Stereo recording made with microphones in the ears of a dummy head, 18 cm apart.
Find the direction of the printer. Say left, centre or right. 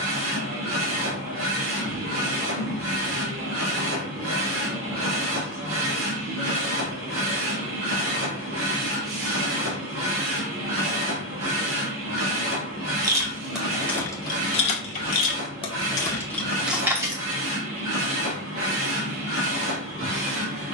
right.